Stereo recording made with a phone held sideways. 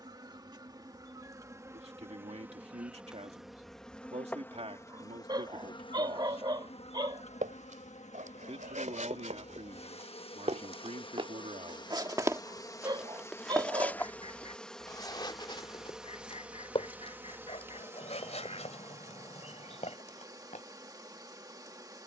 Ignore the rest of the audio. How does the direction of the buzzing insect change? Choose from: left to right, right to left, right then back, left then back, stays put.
left then back.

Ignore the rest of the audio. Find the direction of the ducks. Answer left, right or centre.
left.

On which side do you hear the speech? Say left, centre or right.
right.